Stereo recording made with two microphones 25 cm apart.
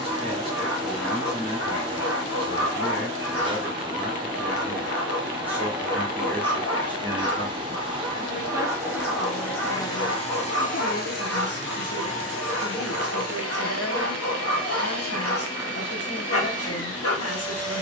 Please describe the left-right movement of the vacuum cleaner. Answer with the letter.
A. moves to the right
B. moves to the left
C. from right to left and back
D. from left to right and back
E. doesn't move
B.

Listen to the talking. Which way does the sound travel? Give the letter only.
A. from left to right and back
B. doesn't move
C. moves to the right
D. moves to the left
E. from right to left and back
D.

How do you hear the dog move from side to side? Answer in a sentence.
You can hear the dog stay put.